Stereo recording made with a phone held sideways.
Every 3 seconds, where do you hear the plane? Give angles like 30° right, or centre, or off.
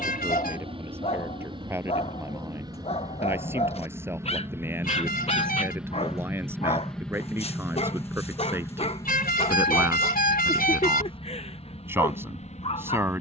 30° right, 20° right, 10° left, 30° left, 40° left.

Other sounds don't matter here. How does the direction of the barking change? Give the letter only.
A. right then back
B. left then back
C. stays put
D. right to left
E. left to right
C.